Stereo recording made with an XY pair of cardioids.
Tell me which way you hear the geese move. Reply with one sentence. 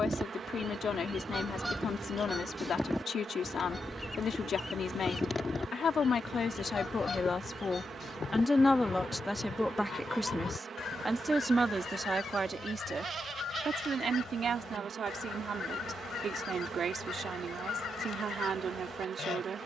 In this clip you hear the geese move to the left.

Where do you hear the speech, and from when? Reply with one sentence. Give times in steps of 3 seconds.
You can hear the speech on the left from 0 s, in the centre from 9 s and on the right from 12 s.